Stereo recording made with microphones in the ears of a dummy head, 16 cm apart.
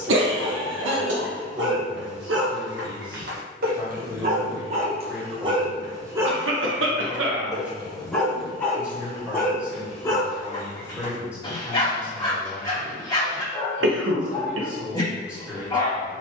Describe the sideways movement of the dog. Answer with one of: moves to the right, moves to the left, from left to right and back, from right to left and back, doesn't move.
moves to the left.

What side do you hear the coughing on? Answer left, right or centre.
right.